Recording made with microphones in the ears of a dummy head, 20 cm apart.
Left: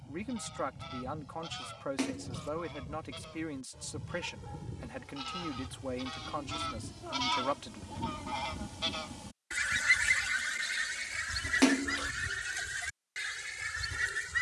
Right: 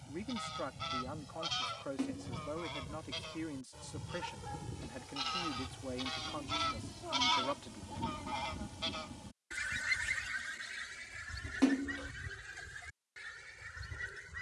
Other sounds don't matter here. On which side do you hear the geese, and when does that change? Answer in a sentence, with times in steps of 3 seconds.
In this clip you hear the geese on the right from 0 s, in the centre from 6 s and on the left from 9 s.